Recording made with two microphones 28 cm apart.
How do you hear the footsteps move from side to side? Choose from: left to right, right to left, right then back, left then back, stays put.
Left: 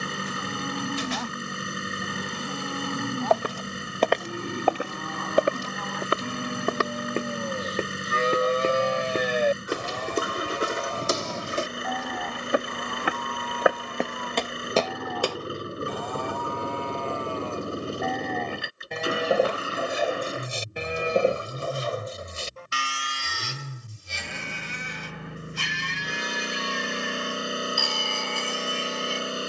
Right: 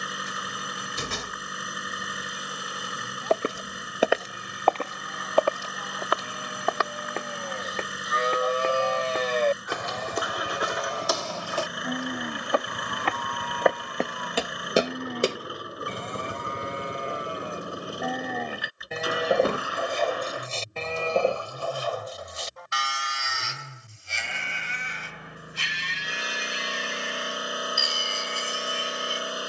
left then back.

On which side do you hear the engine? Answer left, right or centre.
left.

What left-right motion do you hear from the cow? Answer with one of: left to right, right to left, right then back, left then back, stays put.
right then back.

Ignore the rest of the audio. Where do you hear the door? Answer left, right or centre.
right.